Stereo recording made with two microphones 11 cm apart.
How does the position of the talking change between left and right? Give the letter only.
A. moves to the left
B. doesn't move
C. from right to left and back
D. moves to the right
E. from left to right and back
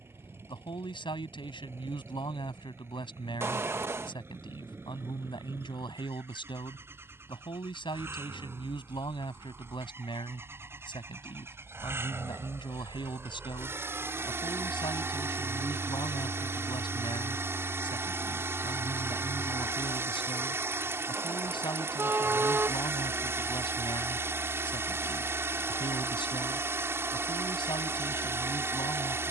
B.